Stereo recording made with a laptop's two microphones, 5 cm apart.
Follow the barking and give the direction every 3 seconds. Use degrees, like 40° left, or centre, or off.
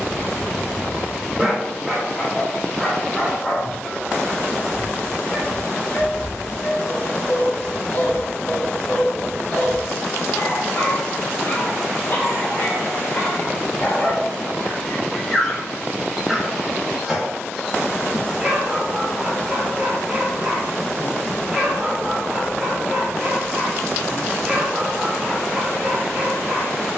10° right, 20° left, 40° left, 50° left, 40° left, centre, 10° right, 10° right, 10° right.